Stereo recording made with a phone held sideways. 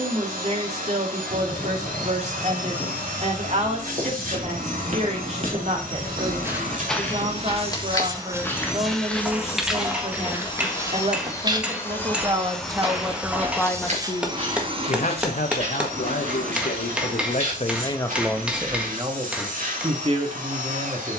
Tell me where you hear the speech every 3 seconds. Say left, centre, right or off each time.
right, right, right, right, centre, left, right.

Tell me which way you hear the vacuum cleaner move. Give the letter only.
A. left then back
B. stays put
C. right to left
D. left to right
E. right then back
A.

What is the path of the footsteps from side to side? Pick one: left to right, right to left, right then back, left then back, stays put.
left then back.